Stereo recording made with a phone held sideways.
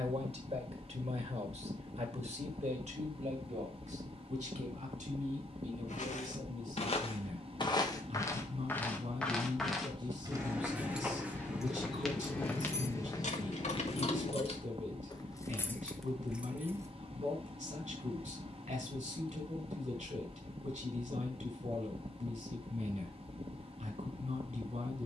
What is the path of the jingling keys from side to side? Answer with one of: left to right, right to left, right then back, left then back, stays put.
left then back.